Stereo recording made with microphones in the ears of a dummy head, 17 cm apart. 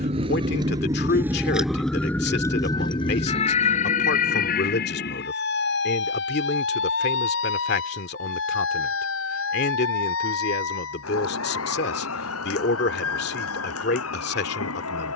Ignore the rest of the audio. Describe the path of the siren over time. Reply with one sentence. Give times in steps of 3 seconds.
In this clip you hear the siren in the centre from 0 s and on the left from 3 s.